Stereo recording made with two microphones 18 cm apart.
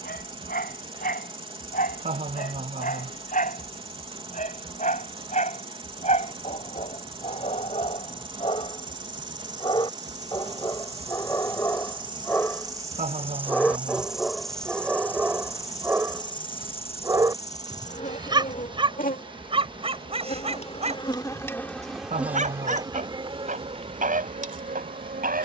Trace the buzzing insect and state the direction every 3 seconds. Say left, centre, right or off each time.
right, right, right, right, centre, left, left, centre, right.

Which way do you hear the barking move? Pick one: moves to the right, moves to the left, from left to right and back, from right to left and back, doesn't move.
moves to the right.